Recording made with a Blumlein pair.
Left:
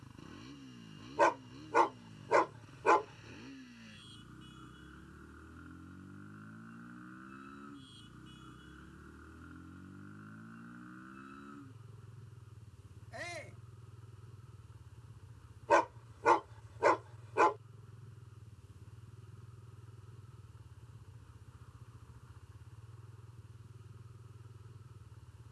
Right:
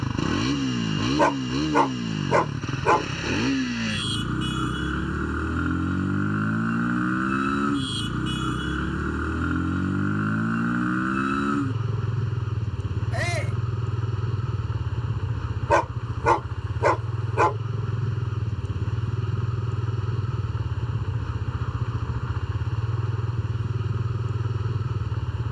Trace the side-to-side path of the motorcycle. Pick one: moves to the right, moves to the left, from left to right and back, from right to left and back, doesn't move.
doesn't move.